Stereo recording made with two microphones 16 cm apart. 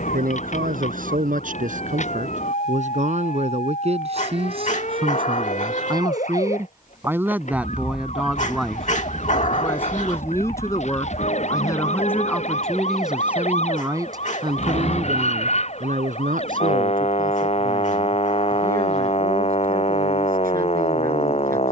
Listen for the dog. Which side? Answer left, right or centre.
left.